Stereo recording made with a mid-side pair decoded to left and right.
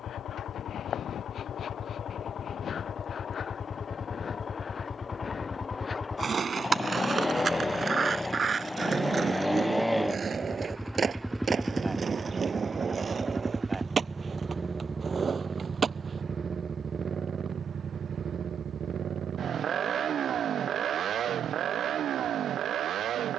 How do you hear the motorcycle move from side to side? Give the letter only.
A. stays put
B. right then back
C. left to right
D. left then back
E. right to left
C.